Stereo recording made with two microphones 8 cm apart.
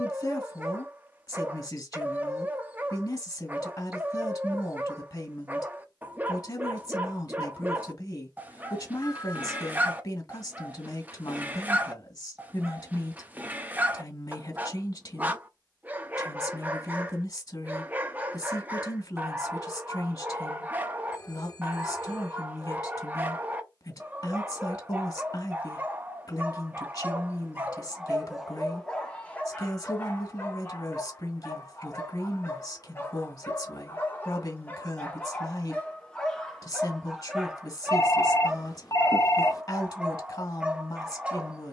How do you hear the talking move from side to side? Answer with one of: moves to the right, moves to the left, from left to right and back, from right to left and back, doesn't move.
doesn't move.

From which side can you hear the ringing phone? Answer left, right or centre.
left.